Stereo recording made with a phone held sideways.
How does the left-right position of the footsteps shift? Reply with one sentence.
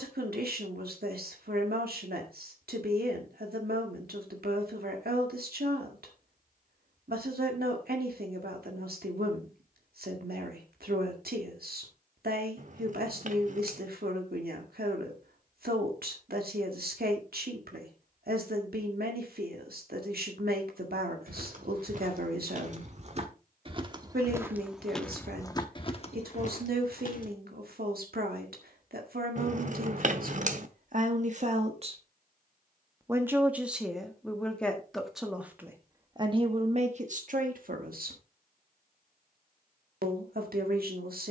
In this clip you hear the footsteps move from right to left.